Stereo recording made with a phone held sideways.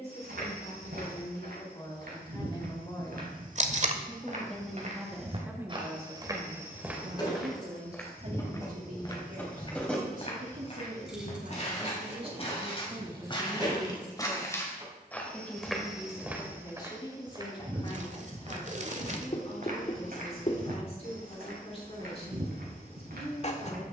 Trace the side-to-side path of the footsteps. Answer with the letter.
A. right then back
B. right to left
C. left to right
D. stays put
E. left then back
E.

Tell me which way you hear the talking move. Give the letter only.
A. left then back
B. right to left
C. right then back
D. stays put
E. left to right
C.